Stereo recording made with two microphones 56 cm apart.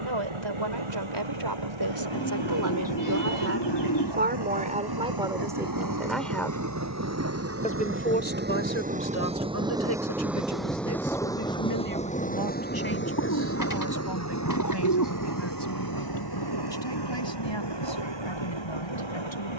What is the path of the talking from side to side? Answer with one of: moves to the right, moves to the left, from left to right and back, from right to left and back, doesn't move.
moves to the left.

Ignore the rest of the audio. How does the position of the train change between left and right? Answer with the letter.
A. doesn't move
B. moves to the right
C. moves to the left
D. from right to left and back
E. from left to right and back
C.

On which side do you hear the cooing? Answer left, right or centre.
left.